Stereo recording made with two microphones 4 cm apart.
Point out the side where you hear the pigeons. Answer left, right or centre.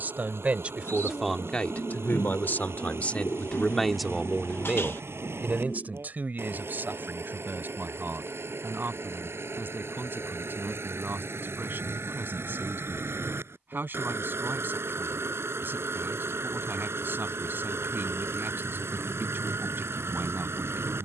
left.